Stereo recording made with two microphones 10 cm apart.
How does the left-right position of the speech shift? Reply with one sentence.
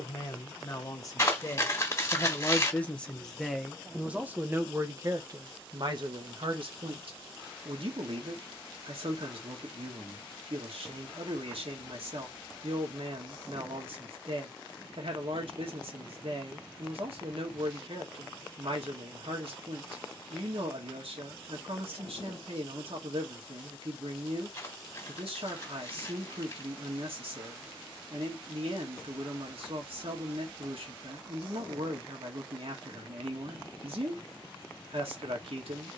In this clip you hear the speech move to the right.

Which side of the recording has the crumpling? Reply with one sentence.
You can hear the crumpling on the left.